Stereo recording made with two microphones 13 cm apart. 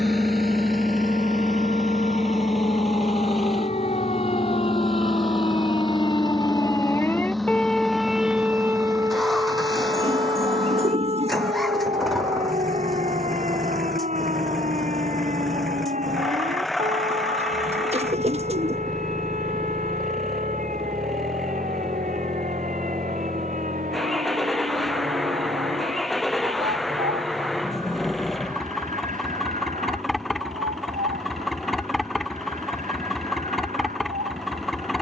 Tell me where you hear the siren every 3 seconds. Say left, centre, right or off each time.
left, left, centre, right, right, right, right, right, right, right, right, right.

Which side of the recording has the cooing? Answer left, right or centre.
right.